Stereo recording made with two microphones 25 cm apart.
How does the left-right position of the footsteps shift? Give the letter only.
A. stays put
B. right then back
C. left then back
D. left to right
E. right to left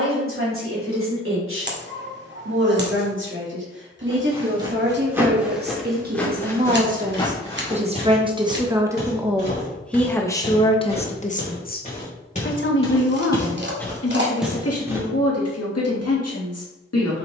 C.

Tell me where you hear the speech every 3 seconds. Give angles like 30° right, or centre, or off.
60° right, 50° right, 30° right, 20° left, 60° left, 80° left.